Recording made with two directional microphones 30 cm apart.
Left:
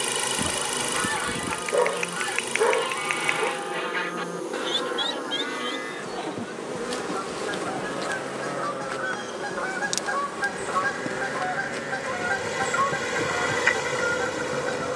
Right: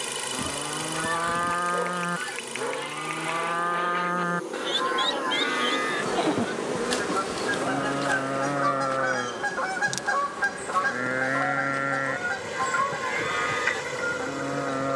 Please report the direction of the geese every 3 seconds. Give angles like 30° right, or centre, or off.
30° left, centre, 40° right, 10° right, 20° left.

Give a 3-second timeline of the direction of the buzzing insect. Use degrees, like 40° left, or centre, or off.
40° left, 10° left, centre, 30° left, 40° left.